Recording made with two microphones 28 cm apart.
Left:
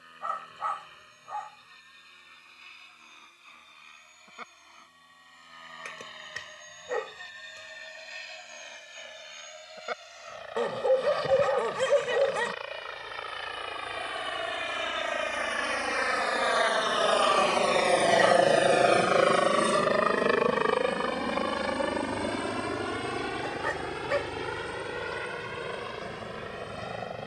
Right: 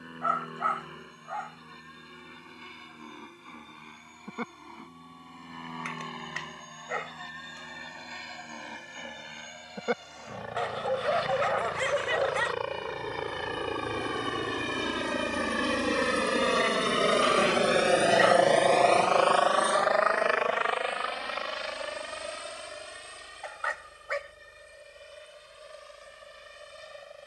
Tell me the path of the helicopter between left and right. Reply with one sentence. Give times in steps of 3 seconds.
In this clip you hear the helicopter on the right from 0 s and on the left from 18 s.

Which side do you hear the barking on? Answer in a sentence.
In this clip you hear the barking on the left.